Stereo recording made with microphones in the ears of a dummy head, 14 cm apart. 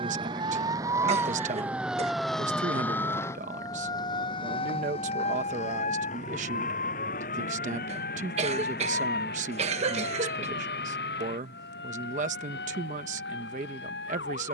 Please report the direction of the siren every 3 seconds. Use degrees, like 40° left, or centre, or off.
10° right, 30° left, 50° left, 60° left, 70° left.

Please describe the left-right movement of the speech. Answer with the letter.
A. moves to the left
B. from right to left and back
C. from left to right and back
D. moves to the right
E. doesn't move
E.